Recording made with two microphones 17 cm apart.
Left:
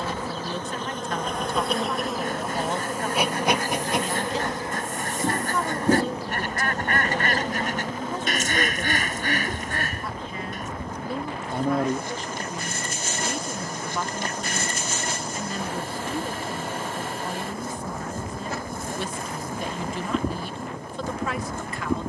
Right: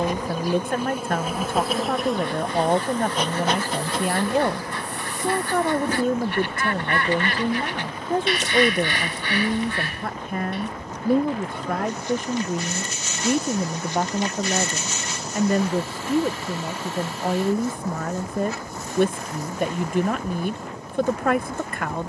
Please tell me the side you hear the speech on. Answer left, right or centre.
right.